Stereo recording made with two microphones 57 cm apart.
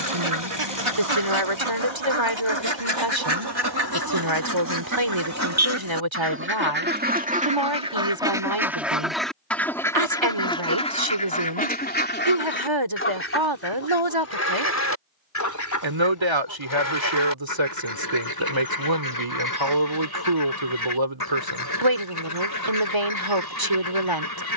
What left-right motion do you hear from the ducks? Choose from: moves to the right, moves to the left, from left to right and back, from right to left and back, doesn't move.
moves to the left.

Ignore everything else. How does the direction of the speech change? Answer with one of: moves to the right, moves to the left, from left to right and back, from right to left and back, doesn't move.
doesn't move.